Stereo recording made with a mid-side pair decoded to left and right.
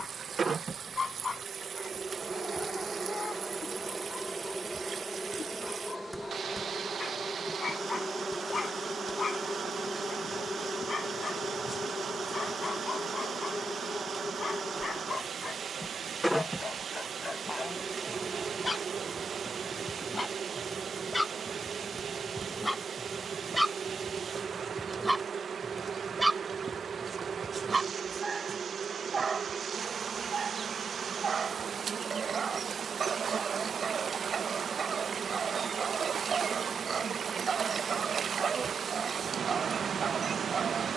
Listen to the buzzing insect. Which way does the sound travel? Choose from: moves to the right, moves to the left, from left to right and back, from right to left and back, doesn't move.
from right to left and back.